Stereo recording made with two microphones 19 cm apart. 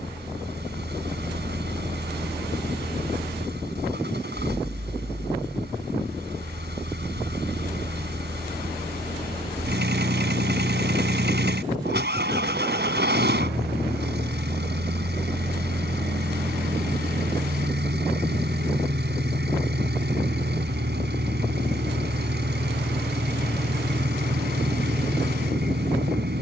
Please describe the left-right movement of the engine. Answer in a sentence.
You can hear the engine stay put.